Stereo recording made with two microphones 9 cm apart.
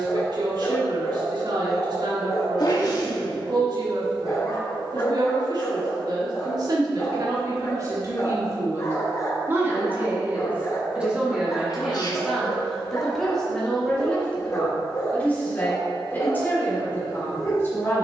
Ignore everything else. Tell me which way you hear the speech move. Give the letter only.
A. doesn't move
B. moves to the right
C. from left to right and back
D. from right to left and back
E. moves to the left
E.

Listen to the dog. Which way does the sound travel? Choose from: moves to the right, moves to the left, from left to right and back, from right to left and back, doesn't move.
doesn't move.